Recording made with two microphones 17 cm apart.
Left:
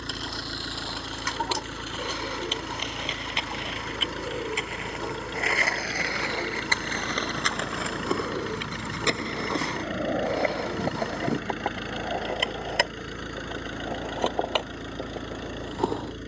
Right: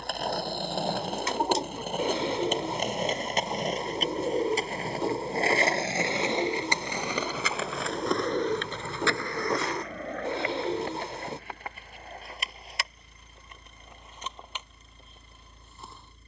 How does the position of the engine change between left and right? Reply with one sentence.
You can hear the engine stay put.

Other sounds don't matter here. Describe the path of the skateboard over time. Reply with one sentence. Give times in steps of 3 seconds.
You can hear the skateboard on the right from 0 s, in the centre from 6 s and on the left from 9 s.